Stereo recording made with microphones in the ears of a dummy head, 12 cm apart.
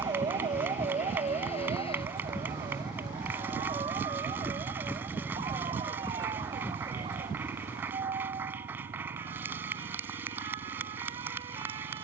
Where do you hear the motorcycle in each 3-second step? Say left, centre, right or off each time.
left, centre, right, right.